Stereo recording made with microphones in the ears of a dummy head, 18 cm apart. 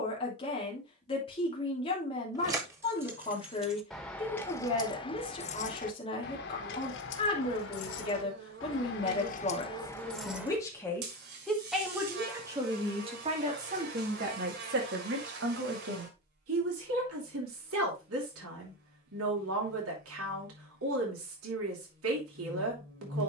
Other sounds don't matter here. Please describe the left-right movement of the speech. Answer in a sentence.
In this clip you hear the speech move from left to right.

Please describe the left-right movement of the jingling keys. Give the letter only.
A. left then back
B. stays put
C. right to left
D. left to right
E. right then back
A.